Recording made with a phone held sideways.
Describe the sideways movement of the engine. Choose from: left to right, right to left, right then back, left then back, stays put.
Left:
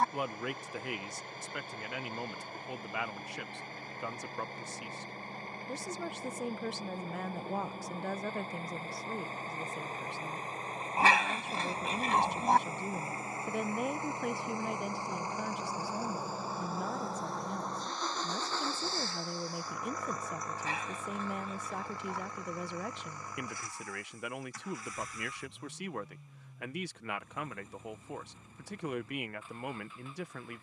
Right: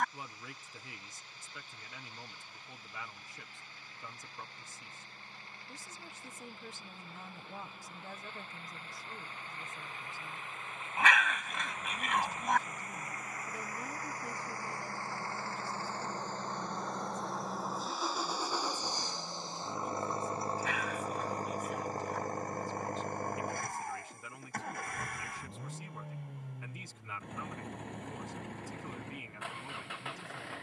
left to right.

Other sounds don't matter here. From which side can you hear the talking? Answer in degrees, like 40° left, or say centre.
70° left.